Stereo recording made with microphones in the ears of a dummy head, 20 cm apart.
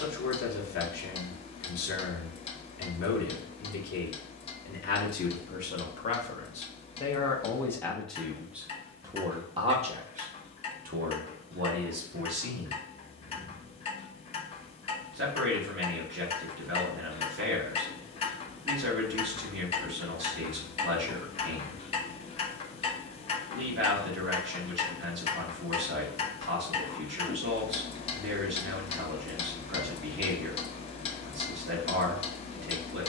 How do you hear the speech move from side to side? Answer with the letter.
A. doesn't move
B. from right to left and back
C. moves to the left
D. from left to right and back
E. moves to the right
E.